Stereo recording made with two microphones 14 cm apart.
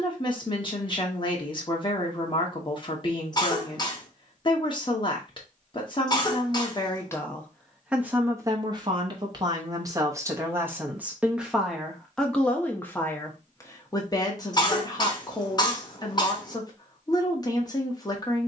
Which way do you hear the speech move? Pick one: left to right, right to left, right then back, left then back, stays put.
right then back.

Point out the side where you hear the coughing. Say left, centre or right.
left.